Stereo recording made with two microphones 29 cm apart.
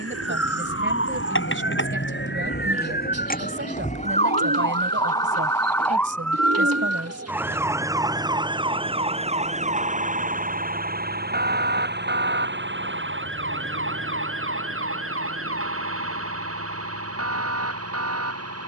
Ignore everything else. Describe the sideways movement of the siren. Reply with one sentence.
In this clip you hear the siren move from left to right.